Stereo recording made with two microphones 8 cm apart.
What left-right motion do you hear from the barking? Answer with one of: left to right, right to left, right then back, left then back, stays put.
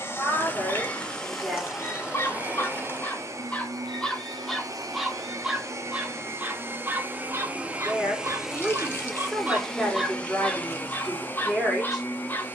right then back.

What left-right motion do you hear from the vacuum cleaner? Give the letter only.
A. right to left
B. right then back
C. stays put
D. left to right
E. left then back
B.